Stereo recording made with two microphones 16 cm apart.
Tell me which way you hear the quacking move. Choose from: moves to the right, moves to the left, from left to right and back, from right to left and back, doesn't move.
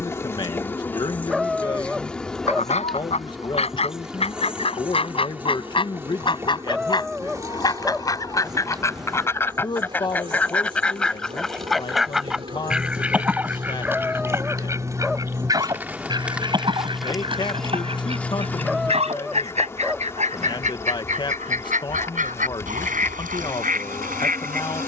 moves to the right.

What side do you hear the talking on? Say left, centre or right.
left.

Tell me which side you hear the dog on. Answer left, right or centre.
centre.